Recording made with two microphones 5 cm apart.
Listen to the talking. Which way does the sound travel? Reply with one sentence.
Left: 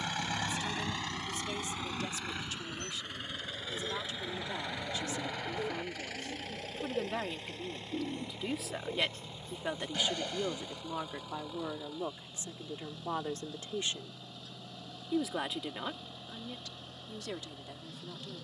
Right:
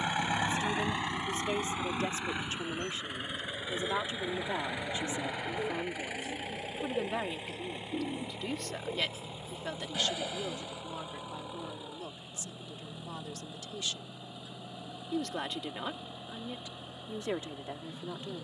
In this clip you hear the talking go left and come back.